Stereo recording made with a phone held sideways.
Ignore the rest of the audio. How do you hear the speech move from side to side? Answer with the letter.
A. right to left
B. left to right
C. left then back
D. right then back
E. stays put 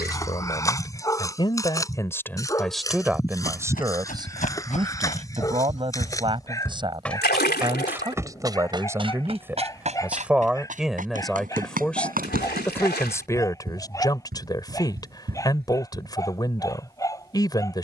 D.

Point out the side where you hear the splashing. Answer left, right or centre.
left.